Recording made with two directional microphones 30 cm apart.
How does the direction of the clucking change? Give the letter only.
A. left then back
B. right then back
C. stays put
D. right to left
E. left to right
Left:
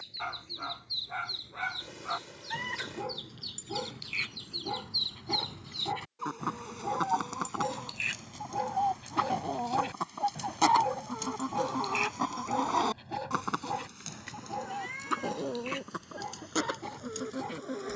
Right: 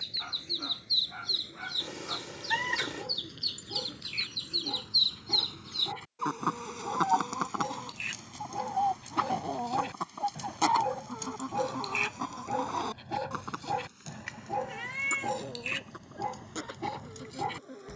D.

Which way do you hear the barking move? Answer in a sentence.
You can hear the barking travel towards the right.